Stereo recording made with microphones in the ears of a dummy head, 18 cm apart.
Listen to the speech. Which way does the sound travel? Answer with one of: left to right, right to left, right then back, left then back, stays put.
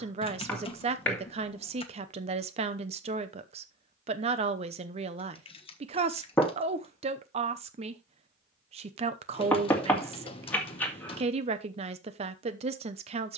stays put.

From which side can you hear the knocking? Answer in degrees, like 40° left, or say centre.
10° left.